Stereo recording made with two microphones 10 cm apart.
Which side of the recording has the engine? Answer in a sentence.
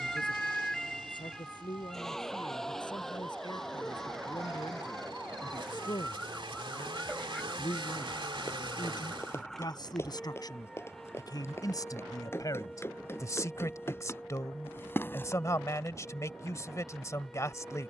In this clip you hear the engine on the right.